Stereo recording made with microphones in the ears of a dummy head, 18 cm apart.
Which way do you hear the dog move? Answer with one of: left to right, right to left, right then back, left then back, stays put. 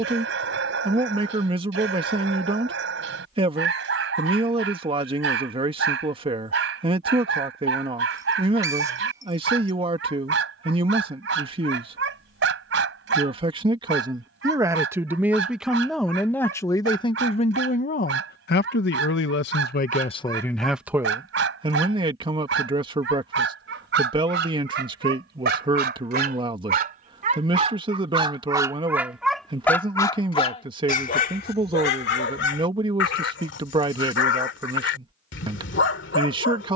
right to left.